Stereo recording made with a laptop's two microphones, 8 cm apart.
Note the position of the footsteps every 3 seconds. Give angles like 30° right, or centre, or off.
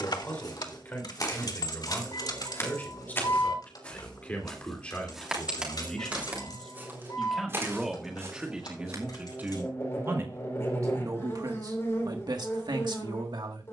50° left, 10° left, 30° right, off, off.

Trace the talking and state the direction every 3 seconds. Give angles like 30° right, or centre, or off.
20° left, 20° left, centre, 40° right, 70° right.